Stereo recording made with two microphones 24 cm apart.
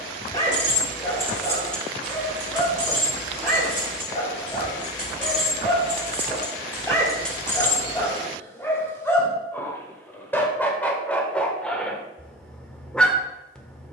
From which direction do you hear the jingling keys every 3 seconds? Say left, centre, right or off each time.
centre, right, centre, off, off.